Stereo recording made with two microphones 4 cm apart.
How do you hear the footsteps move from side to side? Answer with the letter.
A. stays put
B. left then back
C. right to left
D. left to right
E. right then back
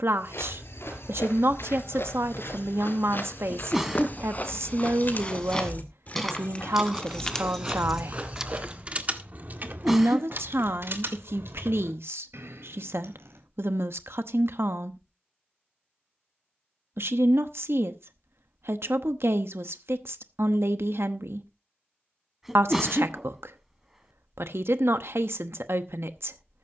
D.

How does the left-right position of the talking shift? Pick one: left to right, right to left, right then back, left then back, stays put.
stays put.